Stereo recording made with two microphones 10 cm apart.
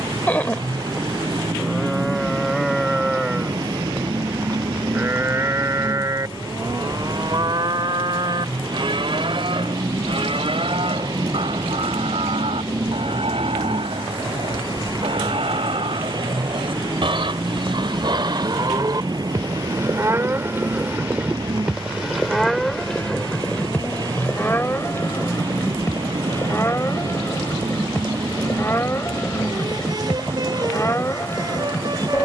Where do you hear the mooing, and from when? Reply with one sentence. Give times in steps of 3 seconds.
You can hear the mooing in the centre from 0 s, on the right from 3 s, in the centre from 21 s and on the left from 24 s.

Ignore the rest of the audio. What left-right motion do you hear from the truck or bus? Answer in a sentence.
You can hear the truck or bus stay put.